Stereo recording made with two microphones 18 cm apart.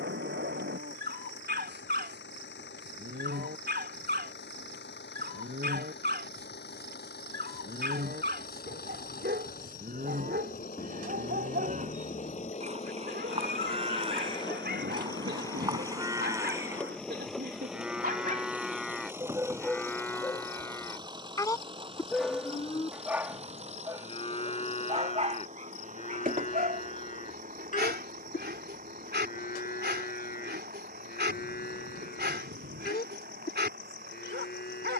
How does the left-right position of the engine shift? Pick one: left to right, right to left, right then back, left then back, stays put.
left to right.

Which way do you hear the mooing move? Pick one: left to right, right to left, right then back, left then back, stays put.
right to left.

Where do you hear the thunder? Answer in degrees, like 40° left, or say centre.
80° right.